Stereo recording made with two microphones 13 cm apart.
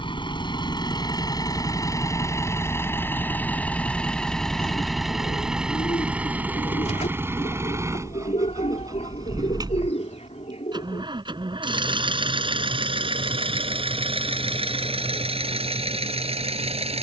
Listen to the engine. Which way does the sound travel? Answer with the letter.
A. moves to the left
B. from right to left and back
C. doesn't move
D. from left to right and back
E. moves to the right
E.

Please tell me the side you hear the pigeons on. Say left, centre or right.
left.